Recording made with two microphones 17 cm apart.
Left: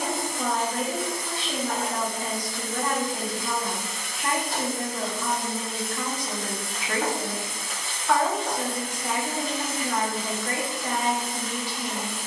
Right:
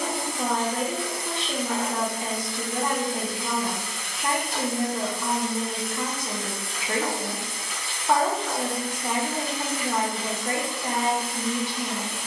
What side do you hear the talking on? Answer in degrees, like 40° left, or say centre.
20° right.